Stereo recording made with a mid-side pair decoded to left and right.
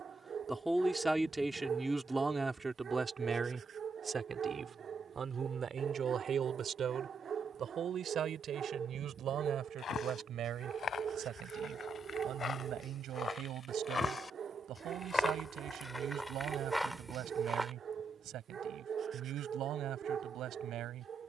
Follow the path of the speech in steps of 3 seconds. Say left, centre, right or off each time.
centre, right, right, right, right, right, right.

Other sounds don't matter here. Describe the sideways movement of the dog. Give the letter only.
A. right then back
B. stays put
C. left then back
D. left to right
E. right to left
B.